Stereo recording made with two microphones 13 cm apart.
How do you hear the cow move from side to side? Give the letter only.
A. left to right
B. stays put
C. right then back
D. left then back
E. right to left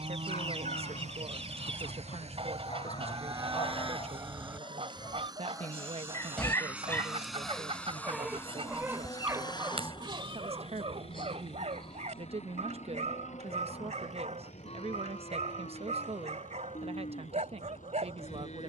E.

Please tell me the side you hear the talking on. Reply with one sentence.
In this clip you hear the talking on the right.